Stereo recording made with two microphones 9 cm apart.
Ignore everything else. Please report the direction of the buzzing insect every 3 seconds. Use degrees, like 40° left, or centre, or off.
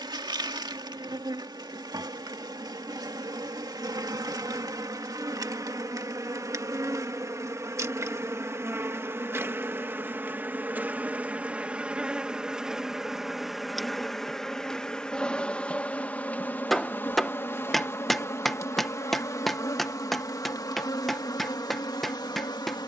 50° right, 50° right, 40° right, 20° right, centre, 20° left, 40° left, 50° left.